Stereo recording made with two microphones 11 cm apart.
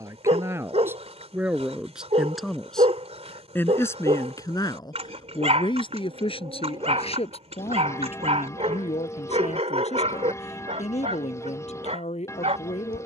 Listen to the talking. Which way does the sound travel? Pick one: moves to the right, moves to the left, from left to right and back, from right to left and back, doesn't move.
moves to the left.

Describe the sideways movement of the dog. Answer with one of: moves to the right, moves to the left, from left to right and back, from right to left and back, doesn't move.
doesn't move.